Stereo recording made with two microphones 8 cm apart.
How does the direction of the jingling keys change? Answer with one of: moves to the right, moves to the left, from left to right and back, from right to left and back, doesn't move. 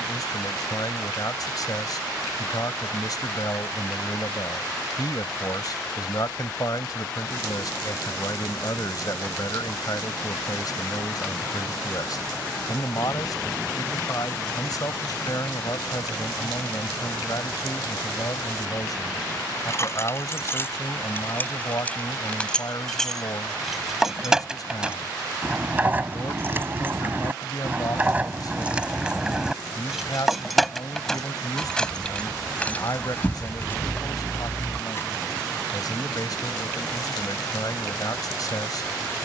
from left to right and back.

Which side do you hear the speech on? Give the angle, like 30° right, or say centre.
60° left.